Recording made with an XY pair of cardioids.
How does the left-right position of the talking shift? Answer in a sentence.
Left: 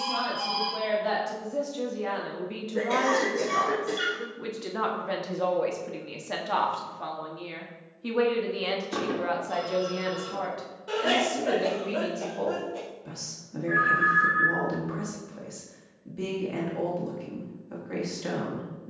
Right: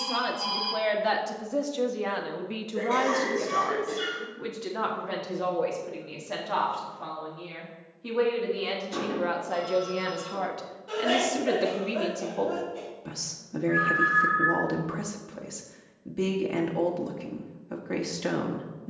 You can hear the talking move from right to left and back again.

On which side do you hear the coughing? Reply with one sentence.
You can hear the coughing on the left.